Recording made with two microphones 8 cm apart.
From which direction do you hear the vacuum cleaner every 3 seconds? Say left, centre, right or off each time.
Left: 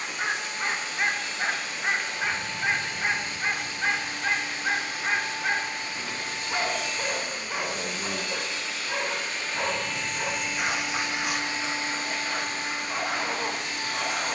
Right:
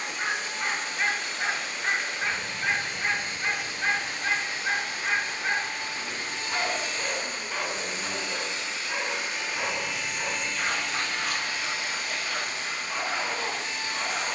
right, right, right, centre, left.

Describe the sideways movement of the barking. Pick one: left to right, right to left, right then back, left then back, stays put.
stays put.